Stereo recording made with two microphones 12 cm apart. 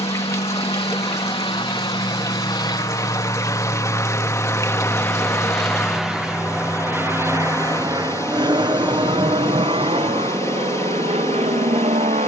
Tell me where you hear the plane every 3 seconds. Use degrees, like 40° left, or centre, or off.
50° left, 20° left, 20° right, 50° right.